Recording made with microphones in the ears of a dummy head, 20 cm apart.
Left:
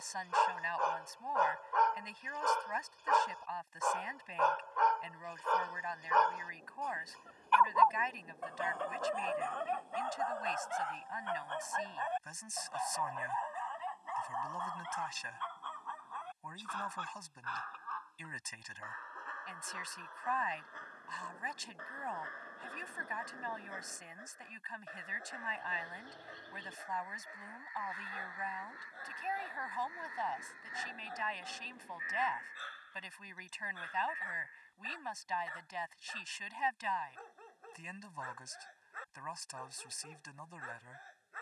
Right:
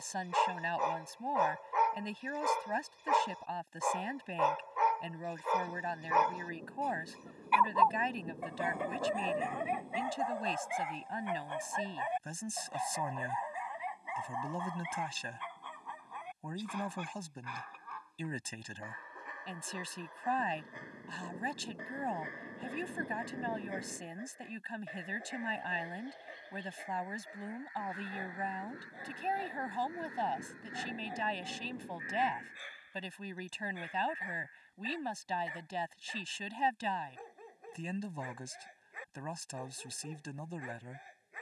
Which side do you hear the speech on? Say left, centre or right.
right.